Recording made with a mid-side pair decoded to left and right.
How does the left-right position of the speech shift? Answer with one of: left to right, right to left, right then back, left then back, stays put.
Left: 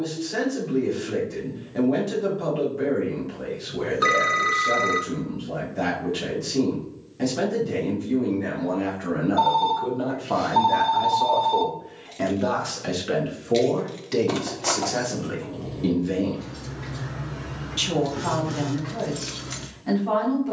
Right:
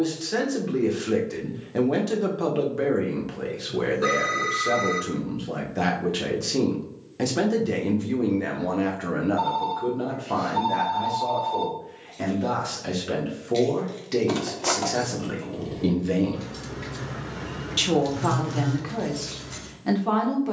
left then back.